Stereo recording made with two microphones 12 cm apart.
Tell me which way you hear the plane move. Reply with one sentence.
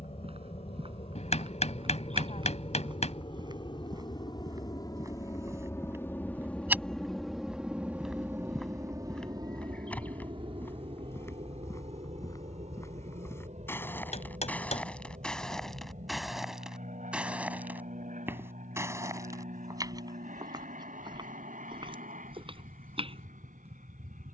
You can hear the plane go from the left side to the right.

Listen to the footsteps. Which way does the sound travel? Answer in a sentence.
In this clip you hear the footsteps go left and come back.